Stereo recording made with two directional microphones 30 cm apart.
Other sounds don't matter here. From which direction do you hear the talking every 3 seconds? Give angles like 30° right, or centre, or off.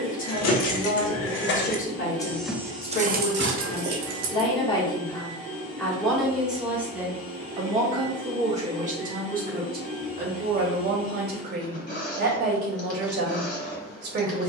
40° left, 20° left, 10° right, 30° right, 40° right.